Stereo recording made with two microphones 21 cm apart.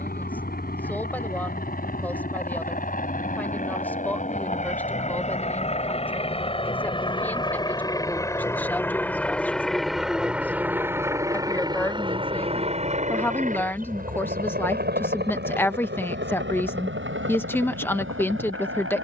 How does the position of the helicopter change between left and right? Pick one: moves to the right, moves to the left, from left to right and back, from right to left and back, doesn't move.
moves to the right.